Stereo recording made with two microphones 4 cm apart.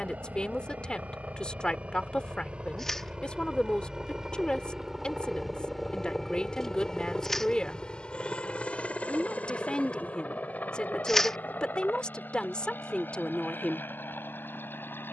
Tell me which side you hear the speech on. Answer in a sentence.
In this clip you hear the speech on the left.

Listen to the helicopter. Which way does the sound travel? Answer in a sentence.
In this clip you hear the helicopter move to the left.